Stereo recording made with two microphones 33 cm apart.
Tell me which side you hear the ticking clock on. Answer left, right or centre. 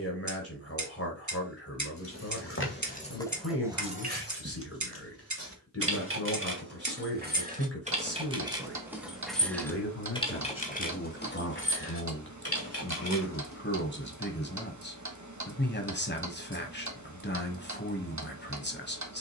right.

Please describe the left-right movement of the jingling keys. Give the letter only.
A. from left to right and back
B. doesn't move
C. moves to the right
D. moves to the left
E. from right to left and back
A.